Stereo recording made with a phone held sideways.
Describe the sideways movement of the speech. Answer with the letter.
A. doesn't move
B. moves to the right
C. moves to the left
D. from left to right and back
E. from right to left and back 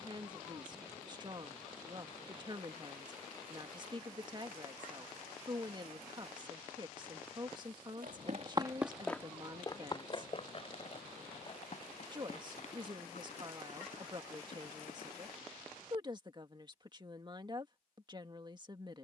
A.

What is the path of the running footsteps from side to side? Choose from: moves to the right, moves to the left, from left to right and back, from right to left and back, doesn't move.
moves to the left.